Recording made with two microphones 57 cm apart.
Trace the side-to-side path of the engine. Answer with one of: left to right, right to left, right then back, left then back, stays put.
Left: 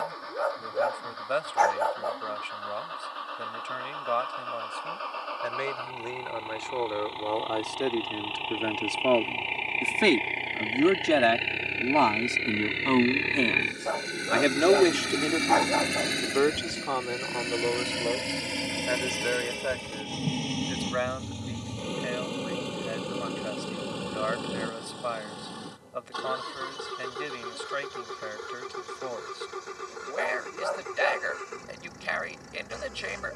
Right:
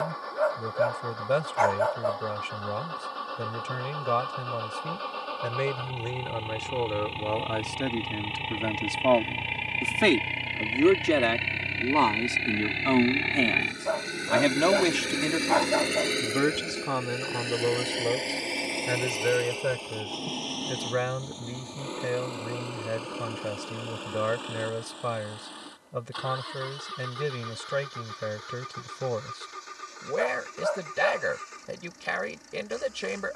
right to left.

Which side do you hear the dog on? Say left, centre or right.
left.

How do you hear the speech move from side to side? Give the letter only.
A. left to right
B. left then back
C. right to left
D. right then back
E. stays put
B.